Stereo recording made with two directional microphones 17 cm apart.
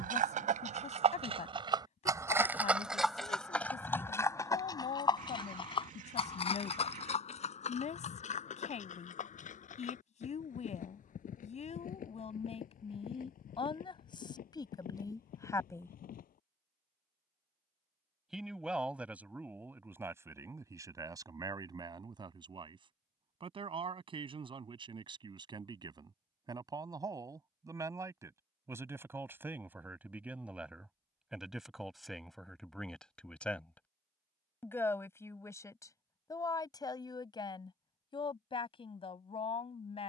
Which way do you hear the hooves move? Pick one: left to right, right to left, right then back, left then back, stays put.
right to left.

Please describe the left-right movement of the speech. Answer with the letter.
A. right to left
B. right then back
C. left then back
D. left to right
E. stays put
B.